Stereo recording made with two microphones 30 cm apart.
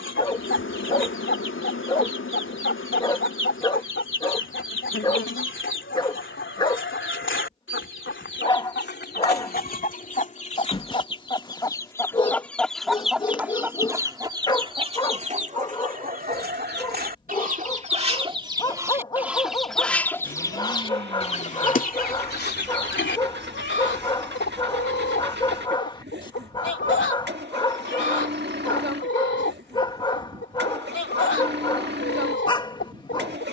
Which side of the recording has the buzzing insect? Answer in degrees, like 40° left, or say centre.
40° left.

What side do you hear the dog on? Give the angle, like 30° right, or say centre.
20° left.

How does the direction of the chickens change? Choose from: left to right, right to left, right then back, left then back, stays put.
right then back.